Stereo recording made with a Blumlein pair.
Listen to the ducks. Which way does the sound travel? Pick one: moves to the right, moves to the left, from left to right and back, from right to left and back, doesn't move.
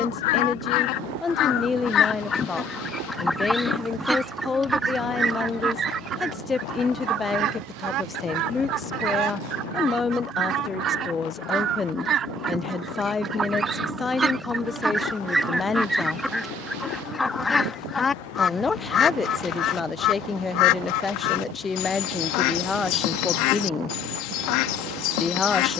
from left to right and back.